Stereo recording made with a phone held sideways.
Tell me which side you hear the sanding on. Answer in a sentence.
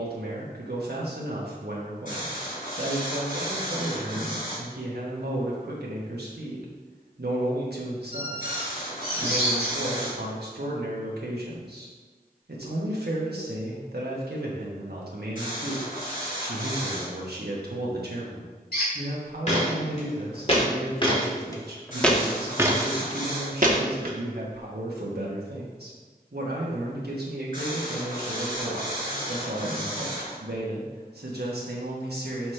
In this clip you hear the sanding on the left.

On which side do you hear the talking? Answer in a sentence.
In this clip you hear the talking on the right.